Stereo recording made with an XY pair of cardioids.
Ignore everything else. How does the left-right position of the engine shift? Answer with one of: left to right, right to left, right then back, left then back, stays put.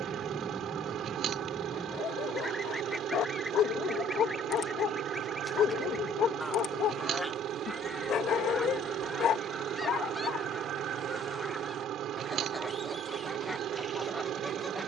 stays put.